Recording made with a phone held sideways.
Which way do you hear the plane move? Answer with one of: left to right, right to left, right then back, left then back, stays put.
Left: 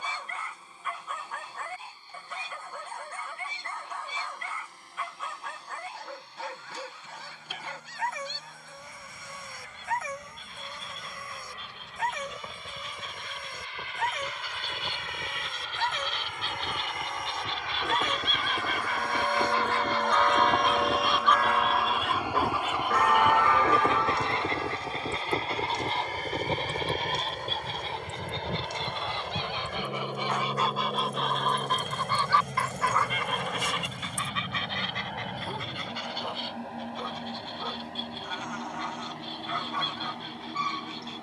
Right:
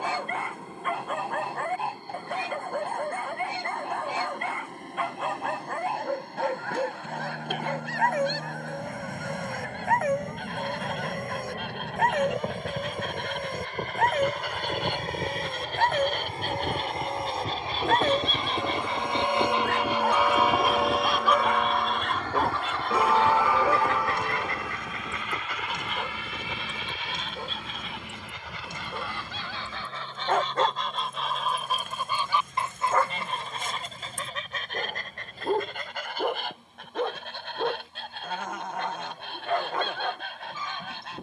right to left.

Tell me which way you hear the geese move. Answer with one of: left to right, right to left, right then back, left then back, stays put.
left then back.